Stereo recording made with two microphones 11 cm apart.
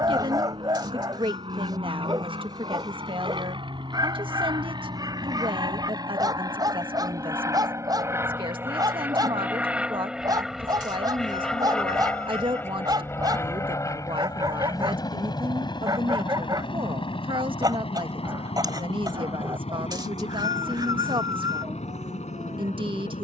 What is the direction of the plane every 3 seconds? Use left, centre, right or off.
right, right, right, centre, left, left, left, left.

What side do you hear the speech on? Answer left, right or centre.
right.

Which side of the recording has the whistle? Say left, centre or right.
right.